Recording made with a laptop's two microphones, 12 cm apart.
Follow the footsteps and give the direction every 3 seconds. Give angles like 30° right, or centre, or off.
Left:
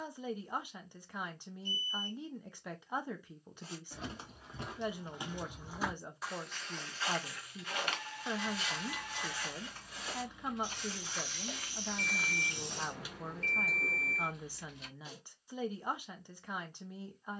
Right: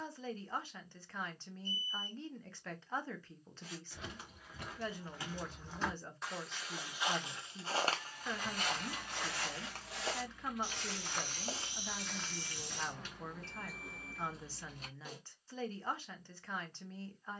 off, 20° left, 30° right, 50° right, 20° left, off.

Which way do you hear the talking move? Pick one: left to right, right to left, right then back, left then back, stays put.
stays put.